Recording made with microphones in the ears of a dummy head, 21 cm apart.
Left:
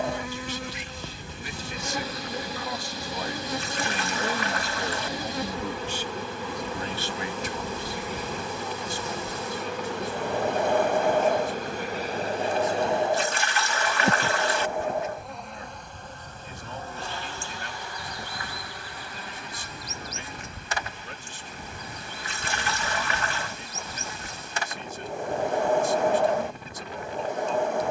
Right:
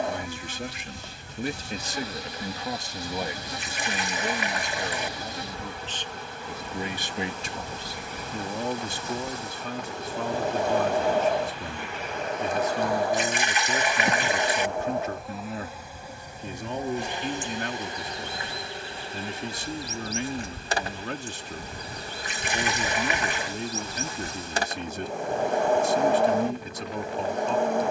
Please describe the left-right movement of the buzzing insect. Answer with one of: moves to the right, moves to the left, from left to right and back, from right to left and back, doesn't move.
moves to the right.